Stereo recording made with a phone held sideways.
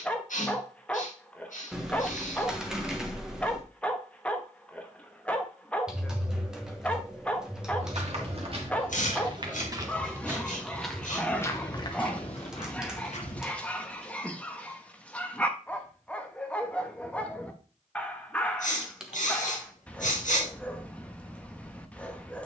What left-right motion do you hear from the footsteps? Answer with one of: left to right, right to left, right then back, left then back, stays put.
right to left.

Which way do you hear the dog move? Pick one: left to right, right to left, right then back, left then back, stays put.
stays put.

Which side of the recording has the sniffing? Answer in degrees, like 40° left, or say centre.
70° left.